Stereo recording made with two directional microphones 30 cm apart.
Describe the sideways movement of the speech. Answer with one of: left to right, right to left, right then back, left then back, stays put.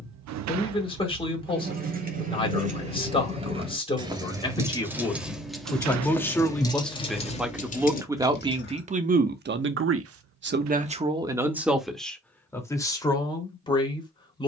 right then back.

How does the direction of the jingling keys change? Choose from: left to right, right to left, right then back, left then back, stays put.
right to left.